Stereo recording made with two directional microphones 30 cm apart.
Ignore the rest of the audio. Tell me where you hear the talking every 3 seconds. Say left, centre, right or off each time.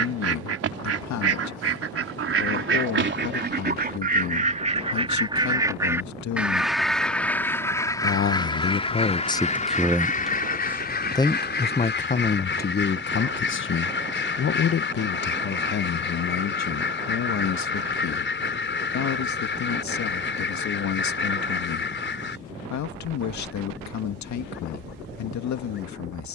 left, left, left, centre, left, left, left, left, left.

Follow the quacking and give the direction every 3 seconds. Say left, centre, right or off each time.
right, right, centre, left, left, left, left, left, off.